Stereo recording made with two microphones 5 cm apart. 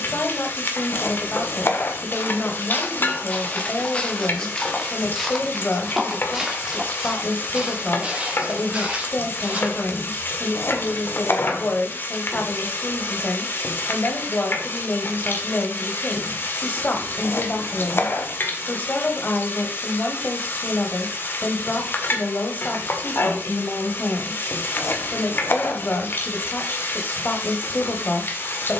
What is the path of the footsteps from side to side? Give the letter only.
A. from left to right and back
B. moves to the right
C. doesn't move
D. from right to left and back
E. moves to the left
B.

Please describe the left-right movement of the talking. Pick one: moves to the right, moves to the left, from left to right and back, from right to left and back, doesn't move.
doesn't move.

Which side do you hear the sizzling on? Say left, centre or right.
left.